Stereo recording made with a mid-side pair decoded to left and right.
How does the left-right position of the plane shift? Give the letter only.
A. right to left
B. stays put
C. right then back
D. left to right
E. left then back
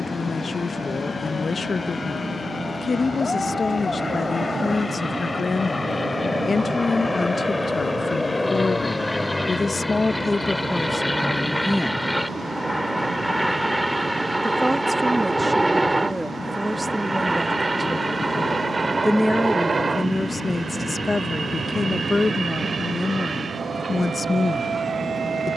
D.